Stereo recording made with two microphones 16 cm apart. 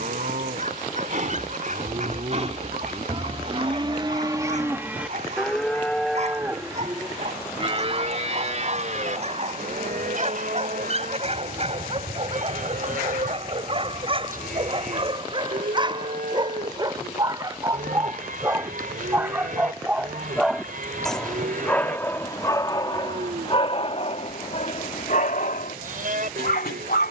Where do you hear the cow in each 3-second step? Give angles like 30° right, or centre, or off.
50° right, 20° right, 30° right, 60° right, 60° right, 60° right, 60° right, 60° right, 60° right.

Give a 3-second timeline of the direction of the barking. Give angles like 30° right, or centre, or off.
50° right, 50° right, 50° right, 40° right, 40° right, 30° right, 10° right, 20° left, 60° left.